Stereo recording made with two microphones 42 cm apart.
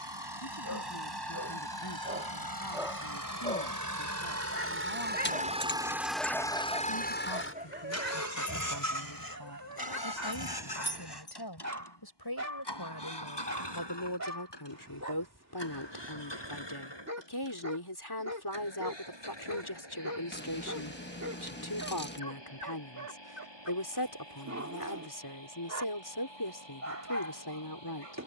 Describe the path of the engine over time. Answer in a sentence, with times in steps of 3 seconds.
In this clip you hear the engine on the right from 0 s and on the left from 6 s.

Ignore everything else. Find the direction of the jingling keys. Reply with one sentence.
You can hear the jingling keys on the left.